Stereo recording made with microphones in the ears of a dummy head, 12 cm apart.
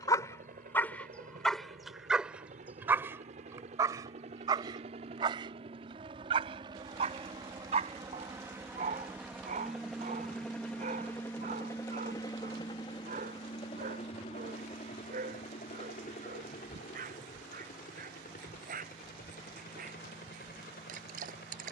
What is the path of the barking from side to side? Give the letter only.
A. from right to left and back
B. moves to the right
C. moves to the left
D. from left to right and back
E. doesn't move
B.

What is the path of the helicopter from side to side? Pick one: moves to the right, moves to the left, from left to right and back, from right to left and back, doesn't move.
moves to the left.